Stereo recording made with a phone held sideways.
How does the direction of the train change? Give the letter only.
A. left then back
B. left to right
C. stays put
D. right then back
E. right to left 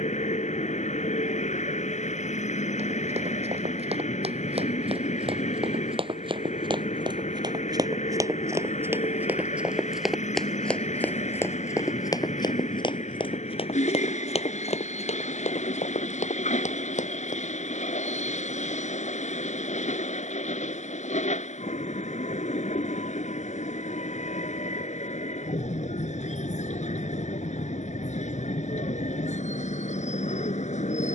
C.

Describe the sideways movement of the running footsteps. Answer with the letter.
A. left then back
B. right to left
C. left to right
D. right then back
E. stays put
B.